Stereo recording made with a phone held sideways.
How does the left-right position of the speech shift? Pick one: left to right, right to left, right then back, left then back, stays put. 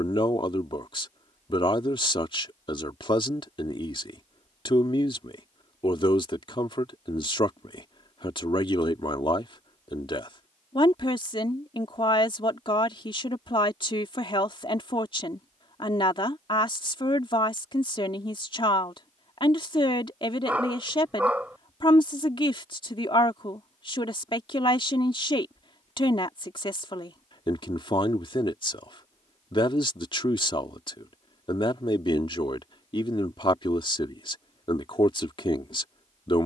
stays put.